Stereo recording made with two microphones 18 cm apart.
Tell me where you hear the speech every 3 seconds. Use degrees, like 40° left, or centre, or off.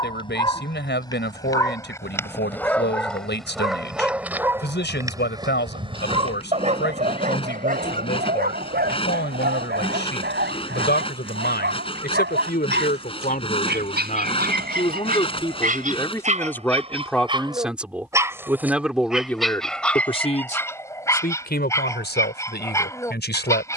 70° left, 70° left, 70° left, 70° left, 50° left, 10° left, 10° left, 60° left.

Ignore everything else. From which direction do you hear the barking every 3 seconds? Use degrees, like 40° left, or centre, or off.
20° left, 10° right, 50° right, 70° right, 60° right, 40° right, centre, 20° left.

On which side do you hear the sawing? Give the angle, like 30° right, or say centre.
30° left.